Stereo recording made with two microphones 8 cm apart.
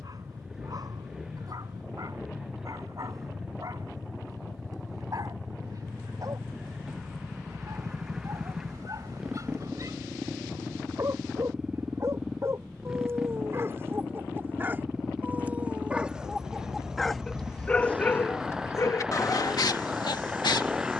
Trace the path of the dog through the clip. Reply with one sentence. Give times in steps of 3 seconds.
In this clip you hear the dog on the right from 0 s, in the centre from 15 s and on the left from 18 s.